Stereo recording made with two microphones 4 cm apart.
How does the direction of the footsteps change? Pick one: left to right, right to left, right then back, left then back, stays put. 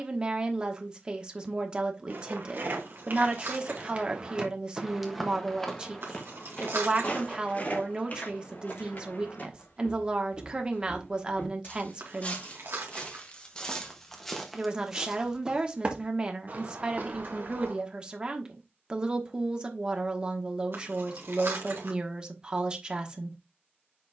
left then back.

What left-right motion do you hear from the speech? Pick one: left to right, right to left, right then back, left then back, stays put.
stays put.